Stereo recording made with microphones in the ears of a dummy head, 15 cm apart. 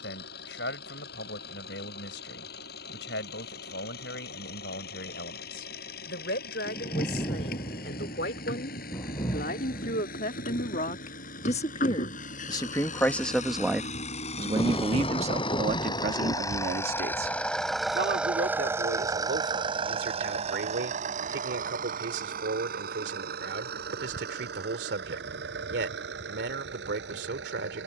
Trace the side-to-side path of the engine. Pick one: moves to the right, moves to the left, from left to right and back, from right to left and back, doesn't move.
moves to the right.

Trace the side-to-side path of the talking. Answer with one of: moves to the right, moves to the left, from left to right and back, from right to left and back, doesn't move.
moves to the right.